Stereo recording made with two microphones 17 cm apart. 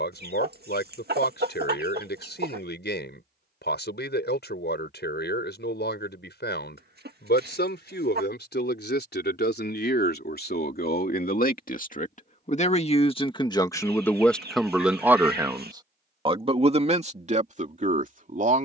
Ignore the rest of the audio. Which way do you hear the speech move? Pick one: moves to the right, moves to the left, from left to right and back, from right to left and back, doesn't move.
moves to the right.